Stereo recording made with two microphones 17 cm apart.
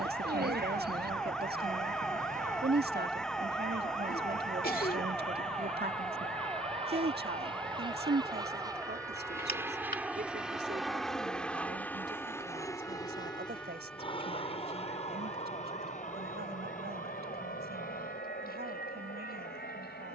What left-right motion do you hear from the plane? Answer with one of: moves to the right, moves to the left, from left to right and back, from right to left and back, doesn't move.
moves to the left.